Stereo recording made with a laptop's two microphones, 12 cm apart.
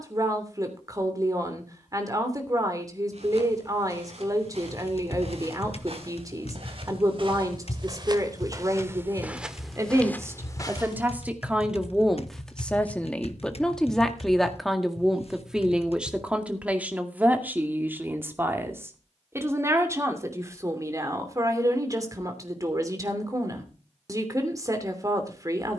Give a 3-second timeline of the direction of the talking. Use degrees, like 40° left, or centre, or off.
30° right, 30° right, 30° right, 20° right, centre, 10° right, 20° right, 30° right, 30° right.